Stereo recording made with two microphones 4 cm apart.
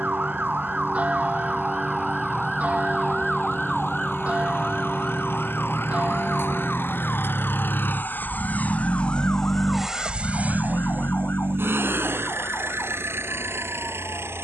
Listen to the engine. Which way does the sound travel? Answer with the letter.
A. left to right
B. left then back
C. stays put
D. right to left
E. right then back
A.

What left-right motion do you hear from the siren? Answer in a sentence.
In this clip you hear the siren move to the left.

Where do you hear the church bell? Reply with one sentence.
In this clip you hear the church bell on the right.